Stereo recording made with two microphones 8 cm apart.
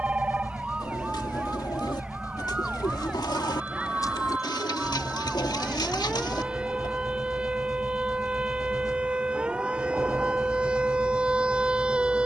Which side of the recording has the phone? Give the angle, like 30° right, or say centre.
20° right.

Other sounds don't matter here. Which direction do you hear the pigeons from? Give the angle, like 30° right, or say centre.
60° left.